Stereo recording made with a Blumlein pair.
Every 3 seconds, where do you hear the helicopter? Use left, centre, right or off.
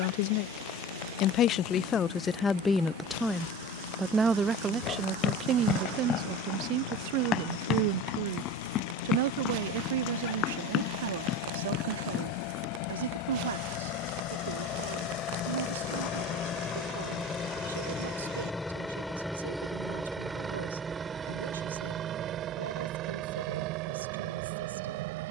left, left, left, left, left, left, centre, right, right.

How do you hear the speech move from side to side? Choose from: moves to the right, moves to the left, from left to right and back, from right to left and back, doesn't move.
moves to the right.